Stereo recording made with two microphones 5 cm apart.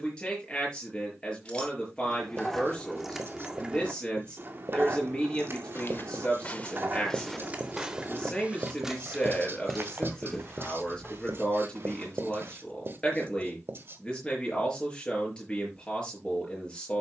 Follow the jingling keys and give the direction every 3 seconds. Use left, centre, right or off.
centre, right, right, centre, off, off.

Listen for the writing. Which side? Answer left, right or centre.
right.